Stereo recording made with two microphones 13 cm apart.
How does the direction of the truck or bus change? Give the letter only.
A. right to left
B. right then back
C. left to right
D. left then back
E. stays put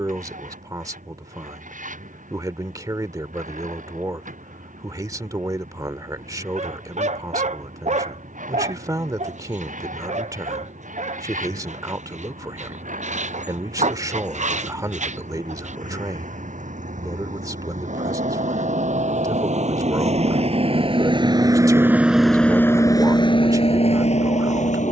A.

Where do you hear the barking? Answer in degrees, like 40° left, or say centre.
60° right.